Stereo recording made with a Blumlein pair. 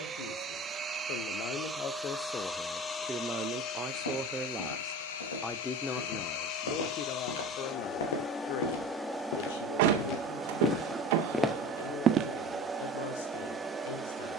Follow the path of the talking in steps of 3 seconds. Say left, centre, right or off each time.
left, centre, left, left, left.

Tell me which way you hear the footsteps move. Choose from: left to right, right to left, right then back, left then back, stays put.
left to right.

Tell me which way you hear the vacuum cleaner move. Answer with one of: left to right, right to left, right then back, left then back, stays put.
left then back.